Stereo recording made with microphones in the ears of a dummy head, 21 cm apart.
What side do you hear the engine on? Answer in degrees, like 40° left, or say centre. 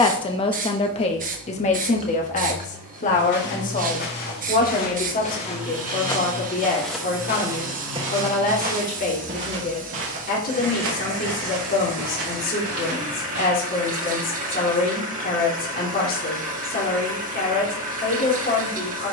70° right.